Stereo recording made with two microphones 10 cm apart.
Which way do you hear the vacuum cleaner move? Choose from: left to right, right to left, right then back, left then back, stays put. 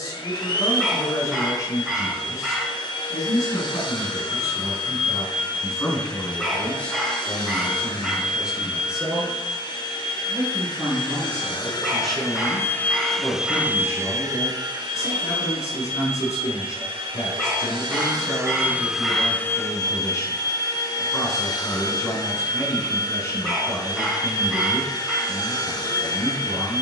right then back.